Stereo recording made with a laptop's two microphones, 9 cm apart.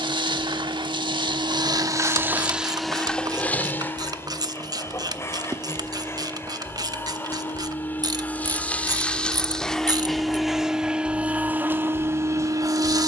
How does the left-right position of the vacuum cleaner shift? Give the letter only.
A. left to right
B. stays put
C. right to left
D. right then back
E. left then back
E.